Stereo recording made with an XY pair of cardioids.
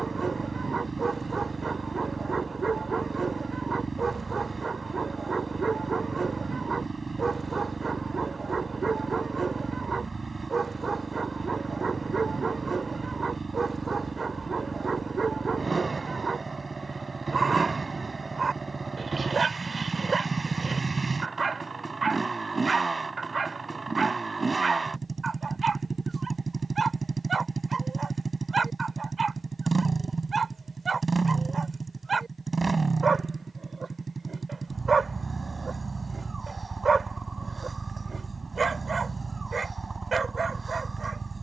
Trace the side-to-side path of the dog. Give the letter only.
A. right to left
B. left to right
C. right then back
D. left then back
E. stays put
E.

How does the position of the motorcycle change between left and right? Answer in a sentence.
You can hear the motorcycle stay put.